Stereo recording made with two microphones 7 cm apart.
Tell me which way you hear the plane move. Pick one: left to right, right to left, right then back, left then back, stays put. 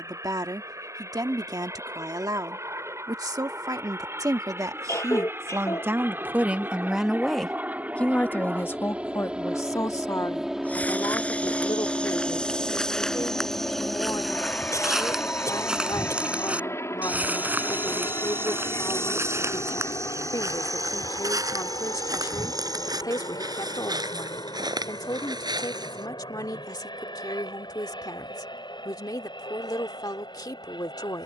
right to left.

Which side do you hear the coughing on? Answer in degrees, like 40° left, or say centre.
50° left.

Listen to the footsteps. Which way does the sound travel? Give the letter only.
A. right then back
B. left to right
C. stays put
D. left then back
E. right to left
B.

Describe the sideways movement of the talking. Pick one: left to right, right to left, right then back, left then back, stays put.
right to left.